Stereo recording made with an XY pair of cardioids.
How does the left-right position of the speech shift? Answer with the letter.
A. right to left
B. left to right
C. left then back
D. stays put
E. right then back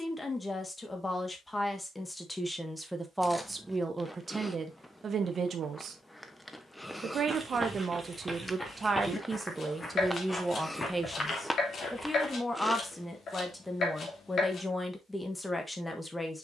E.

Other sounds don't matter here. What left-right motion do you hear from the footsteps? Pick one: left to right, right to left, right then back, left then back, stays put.
right to left.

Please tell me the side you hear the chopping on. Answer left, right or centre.
left.